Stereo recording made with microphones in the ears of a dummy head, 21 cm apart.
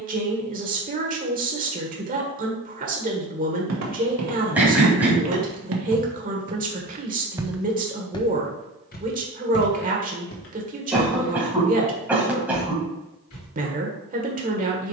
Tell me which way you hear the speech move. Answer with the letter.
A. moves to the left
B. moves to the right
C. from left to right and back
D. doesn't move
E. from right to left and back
D.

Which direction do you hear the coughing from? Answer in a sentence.
You can hear the coughing in the centre.